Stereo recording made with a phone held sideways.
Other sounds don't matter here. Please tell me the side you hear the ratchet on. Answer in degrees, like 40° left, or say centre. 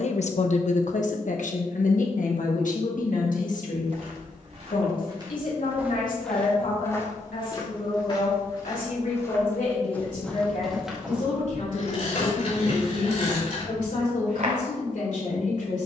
60° left.